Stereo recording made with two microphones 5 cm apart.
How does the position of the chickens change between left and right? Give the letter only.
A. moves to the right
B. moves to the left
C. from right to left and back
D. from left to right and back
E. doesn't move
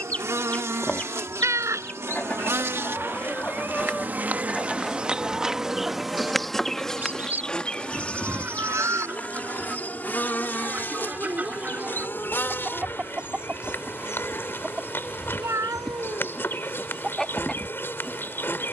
D.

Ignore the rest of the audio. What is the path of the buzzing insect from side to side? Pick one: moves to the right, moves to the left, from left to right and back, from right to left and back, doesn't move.
moves to the left.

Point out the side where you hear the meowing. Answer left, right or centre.
right.